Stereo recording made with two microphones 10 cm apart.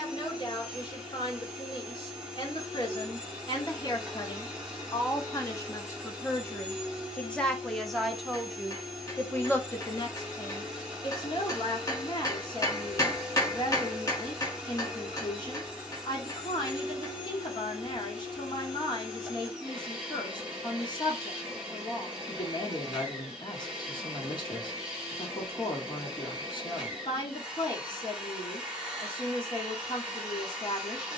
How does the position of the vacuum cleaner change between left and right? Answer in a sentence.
You can hear the vacuum cleaner stay in one place.